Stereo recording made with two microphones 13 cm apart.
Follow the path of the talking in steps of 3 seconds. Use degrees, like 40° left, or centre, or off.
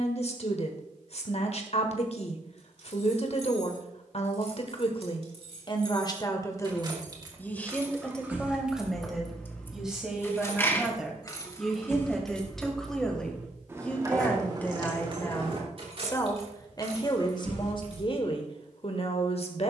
60° left, 50° left, 10° left, centre, 10° left, 30° left, 50° left.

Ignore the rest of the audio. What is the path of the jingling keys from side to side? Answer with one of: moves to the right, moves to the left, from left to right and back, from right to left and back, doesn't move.
from right to left and back.